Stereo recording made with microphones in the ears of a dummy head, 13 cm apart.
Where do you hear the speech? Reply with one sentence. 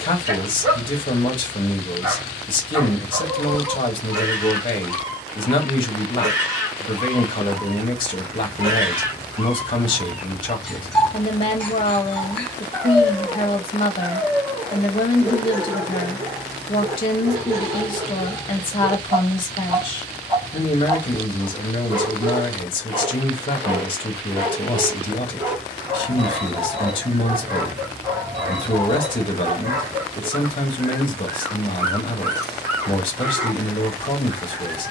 You can hear the speech on the left.